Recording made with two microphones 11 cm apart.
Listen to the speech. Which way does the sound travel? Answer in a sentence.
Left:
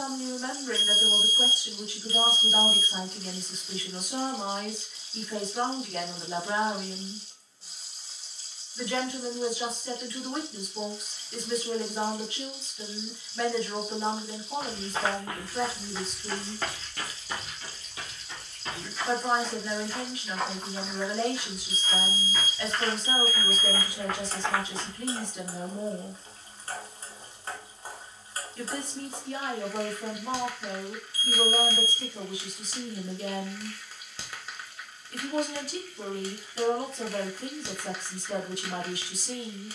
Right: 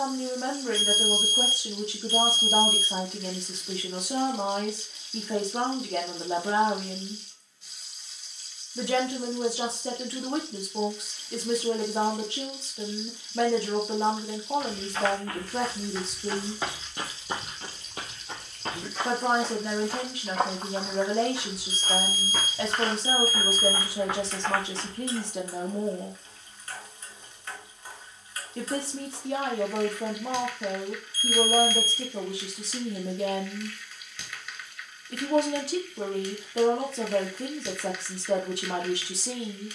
In this clip you hear the speech stay in one place.